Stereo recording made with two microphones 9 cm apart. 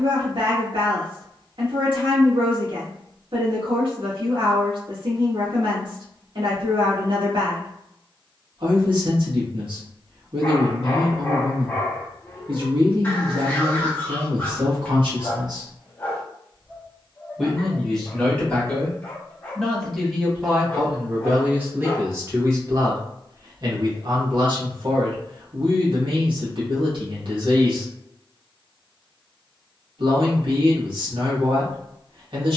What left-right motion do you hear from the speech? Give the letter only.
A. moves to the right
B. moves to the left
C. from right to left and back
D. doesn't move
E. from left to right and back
C.